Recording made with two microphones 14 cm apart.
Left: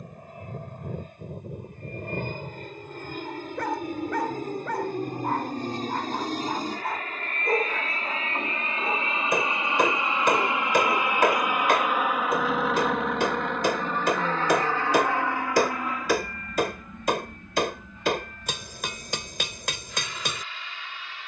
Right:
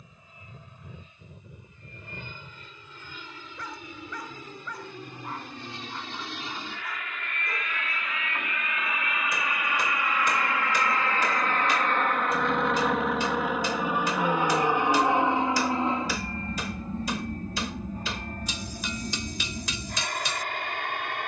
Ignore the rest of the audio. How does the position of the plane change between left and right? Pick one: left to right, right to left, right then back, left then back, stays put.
left to right.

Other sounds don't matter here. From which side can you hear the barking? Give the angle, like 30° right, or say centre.
70° left.